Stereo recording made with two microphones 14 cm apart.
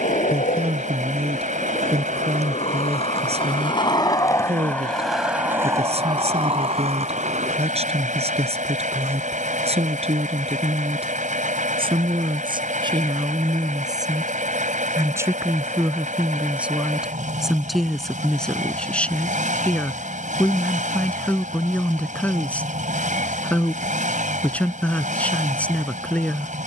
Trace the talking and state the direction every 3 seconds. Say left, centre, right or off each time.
right, right, right, right, right, centre, centre, centre, centre.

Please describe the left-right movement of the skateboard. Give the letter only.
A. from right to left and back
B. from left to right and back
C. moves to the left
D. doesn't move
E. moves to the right
E.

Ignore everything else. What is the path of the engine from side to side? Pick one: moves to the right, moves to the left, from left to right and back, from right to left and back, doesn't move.
doesn't move.